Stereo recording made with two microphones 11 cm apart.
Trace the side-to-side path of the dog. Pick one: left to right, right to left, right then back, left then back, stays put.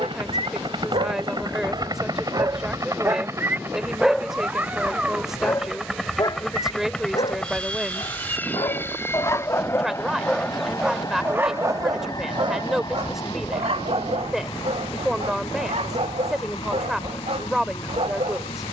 left then back.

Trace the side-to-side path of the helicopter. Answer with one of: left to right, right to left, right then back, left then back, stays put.
right to left.